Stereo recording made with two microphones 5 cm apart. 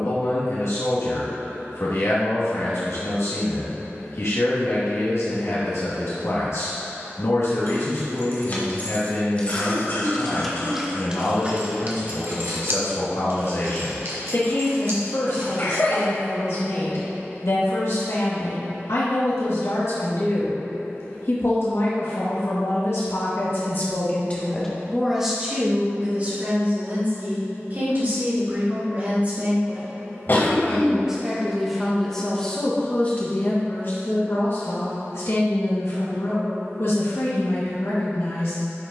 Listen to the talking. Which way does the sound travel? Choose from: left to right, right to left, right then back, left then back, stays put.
right then back.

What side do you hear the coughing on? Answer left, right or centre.
left.